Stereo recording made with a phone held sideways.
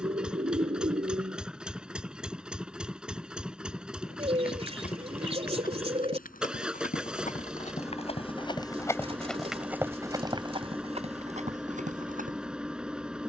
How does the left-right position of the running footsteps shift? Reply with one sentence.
In this clip you hear the running footsteps move to the right.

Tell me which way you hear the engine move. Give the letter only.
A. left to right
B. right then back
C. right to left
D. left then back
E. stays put
E.